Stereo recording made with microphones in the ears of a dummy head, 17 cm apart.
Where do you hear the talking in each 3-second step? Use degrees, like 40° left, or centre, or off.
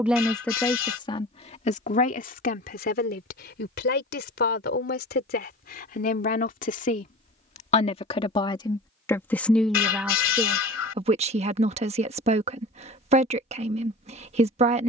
30° left, 50° left, 30° left, 20° right, 30° right.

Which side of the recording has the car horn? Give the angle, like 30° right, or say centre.
70° left.